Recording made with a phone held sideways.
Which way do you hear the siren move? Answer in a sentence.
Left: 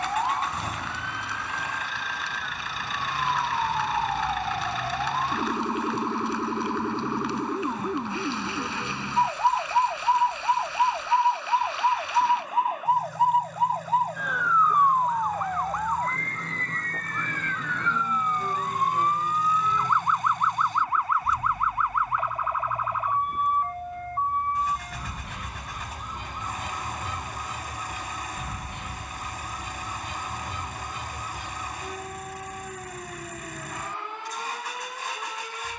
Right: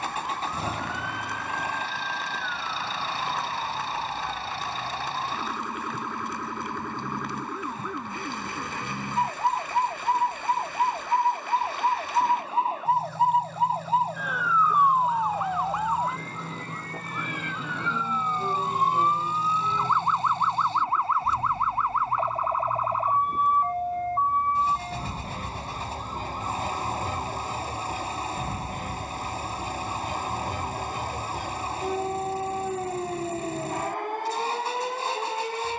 You can hear the siren move from left to right.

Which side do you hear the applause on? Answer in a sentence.
In this clip you hear the applause on the right.